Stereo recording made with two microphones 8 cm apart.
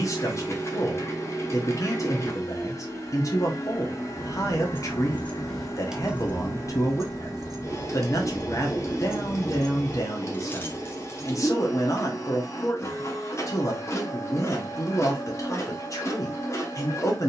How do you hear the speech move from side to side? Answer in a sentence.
You can hear the speech stay in one place.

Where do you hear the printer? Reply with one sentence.
In this clip you hear the printer on the left.